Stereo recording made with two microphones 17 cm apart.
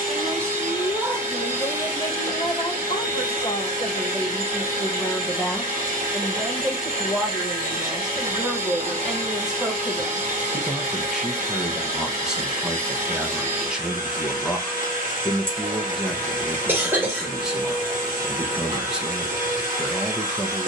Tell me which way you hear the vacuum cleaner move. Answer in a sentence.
You can hear the vacuum cleaner stay in one place.